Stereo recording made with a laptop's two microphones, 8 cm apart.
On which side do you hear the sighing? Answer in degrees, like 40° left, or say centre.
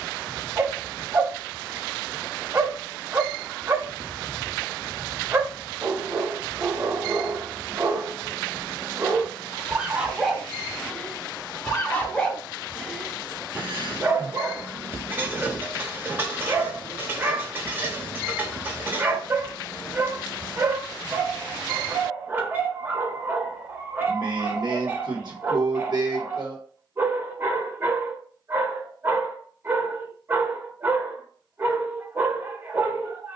60° right.